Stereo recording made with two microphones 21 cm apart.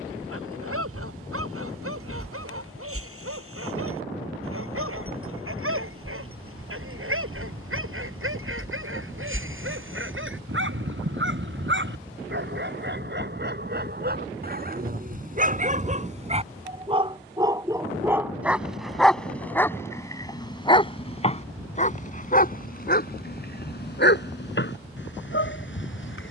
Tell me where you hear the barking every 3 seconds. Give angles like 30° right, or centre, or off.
70° right, 70° right, 70° right, 60° right, 50° right, 30° right, 10° left, 40° left, 50° left.